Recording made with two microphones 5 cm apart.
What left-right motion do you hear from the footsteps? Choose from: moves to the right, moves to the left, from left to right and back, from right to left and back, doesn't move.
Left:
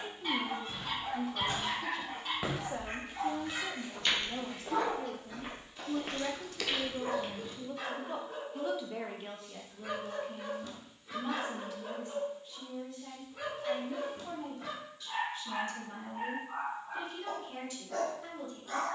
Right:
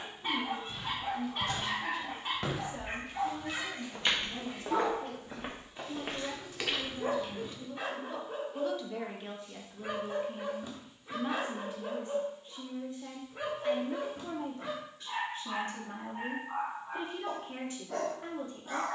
from left to right and back.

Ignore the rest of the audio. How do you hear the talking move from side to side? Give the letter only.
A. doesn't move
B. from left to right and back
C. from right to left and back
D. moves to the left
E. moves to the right
E.